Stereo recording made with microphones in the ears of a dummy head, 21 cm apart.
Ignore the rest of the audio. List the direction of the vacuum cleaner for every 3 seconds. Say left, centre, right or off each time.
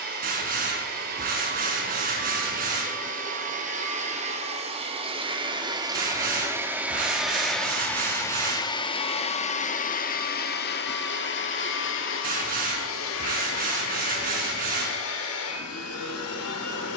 right, right, centre, left, left, left.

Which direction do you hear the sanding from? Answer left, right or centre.
right.